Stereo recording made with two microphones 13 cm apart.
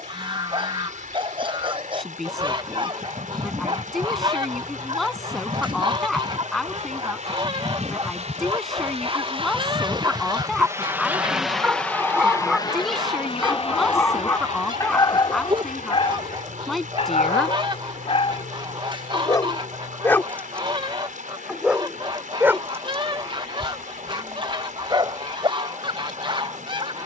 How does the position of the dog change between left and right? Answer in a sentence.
You can hear the dog move from right to left and back again.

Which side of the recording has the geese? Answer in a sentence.
You can hear the geese on the right.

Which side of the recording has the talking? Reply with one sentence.
In this clip you hear the talking in the centre.